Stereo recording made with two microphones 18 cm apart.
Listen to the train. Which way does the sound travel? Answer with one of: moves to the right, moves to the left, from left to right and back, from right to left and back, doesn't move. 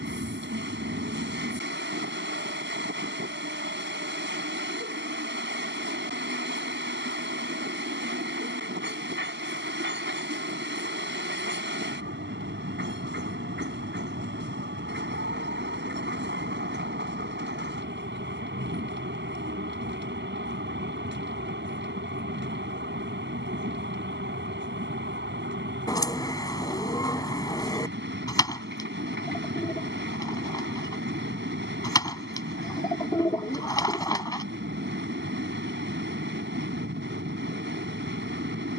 doesn't move.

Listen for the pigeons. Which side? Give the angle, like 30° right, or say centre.
20° left.